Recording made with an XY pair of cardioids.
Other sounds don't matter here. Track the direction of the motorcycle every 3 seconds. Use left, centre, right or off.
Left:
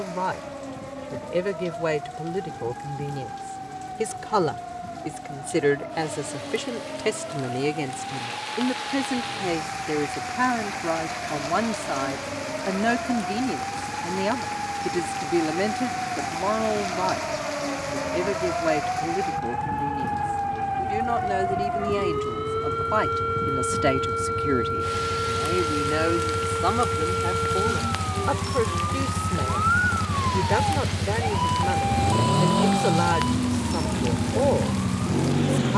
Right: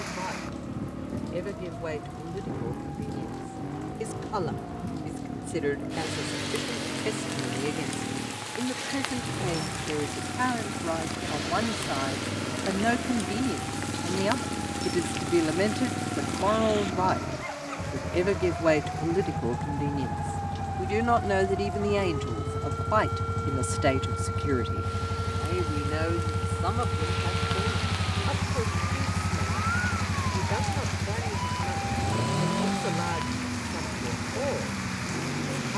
right, right, right, right, right, right, right, right, right, centre, left, left.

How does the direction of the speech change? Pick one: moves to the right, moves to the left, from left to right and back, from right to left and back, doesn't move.
from left to right and back.